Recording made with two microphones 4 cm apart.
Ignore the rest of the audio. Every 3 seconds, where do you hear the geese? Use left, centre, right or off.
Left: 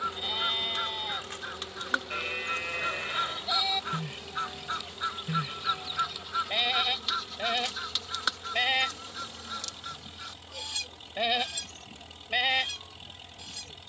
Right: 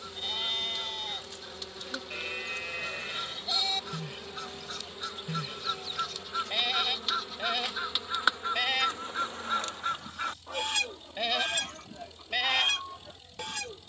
left, left, centre, right, right.